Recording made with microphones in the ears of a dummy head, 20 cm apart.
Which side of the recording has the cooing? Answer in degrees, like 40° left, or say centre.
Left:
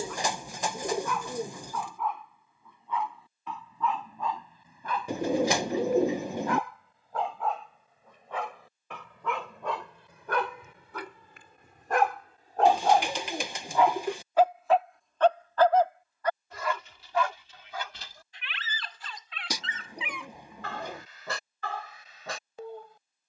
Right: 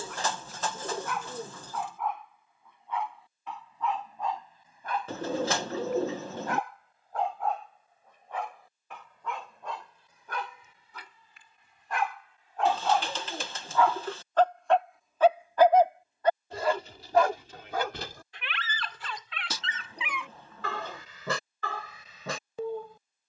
10° left.